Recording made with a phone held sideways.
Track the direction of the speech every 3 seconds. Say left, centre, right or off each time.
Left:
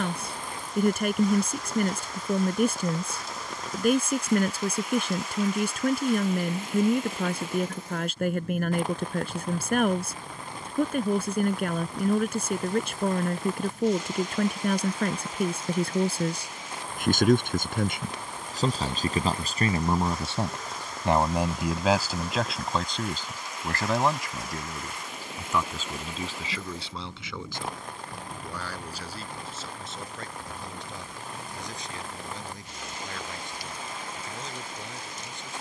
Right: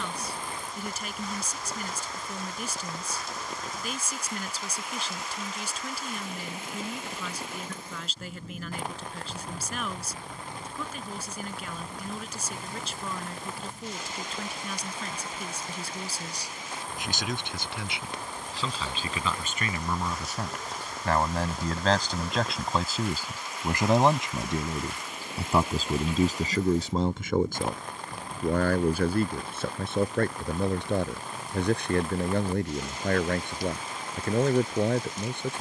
left, left, left, left, left, left, left, centre, right, right, right, right.